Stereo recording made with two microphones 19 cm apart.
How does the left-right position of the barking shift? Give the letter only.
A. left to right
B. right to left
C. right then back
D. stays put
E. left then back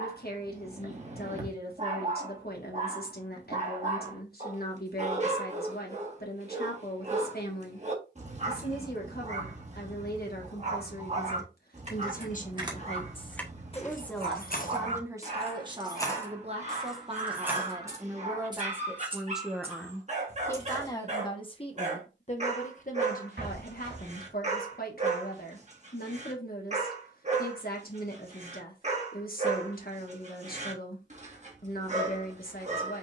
D.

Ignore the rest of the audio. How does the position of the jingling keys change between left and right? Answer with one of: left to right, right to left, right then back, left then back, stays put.
left then back.